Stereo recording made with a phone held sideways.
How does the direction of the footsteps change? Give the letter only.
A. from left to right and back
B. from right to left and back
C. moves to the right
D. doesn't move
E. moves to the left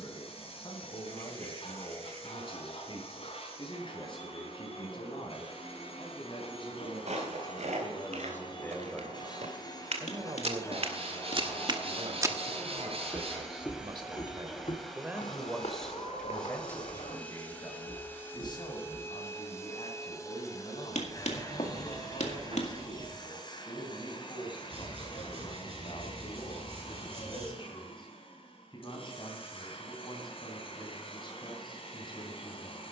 E.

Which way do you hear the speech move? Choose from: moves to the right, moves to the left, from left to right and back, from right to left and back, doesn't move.
from left to right and back.